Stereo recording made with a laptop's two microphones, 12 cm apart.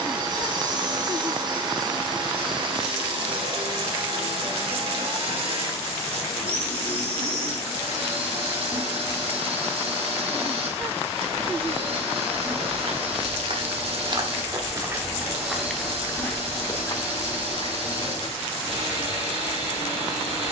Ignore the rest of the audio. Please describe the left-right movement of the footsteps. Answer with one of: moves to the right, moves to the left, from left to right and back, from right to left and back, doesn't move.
moves to the left.